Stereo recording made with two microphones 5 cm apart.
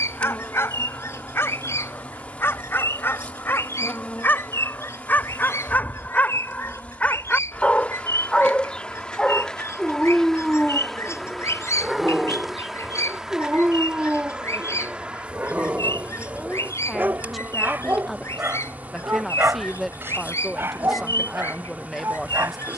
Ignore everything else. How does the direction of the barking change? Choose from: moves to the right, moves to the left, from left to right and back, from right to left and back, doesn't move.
moves to the right.